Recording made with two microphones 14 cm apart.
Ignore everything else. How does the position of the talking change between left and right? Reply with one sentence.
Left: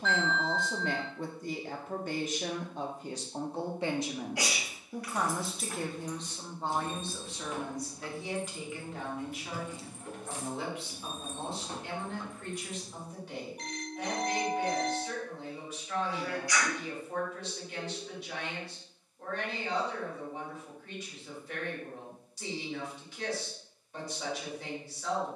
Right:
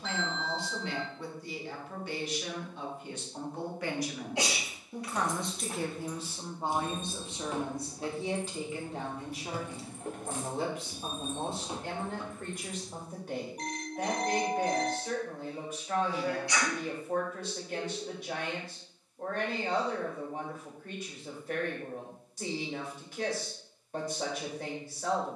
In this clip you hear the talking travel towards the right.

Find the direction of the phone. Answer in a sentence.
In this clip you hear the phone on the right.